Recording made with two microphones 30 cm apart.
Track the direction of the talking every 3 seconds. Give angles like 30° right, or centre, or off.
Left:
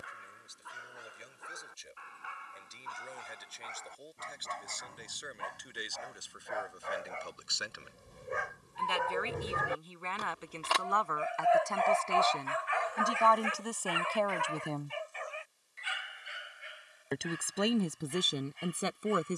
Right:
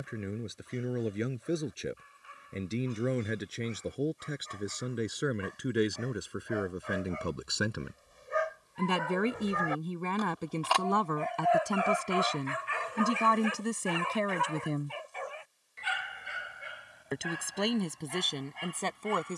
80° right, 70° right, 70° right, 50° right, 30° right, centre, 10° left.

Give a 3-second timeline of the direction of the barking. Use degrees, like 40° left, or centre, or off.
80° left, 80° left, 60° left, 20° left, 40° right, 70° right, 80° right.